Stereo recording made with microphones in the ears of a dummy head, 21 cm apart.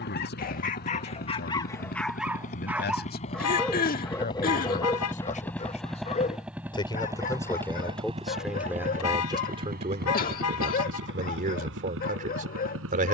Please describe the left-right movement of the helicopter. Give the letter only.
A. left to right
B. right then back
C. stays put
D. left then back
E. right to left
A.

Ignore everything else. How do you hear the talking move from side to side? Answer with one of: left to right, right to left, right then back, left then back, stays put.
left to right.